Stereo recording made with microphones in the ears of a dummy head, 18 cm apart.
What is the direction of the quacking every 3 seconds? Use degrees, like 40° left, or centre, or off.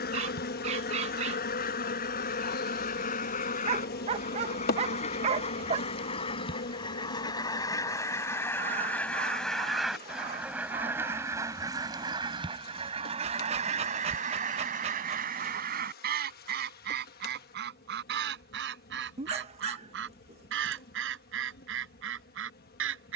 50° left, 40° left, 20° left, 10° right, 40° right, 50° right, 70° right, 70° right.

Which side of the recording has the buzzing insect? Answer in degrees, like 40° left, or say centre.
50° left.